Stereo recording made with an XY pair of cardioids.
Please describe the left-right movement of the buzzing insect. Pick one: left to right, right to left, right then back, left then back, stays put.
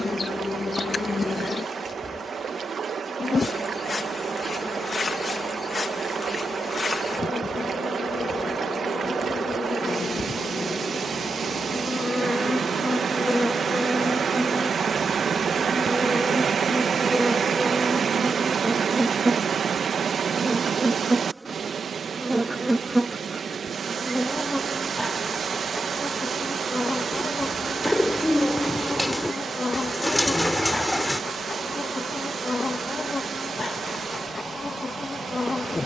right then back.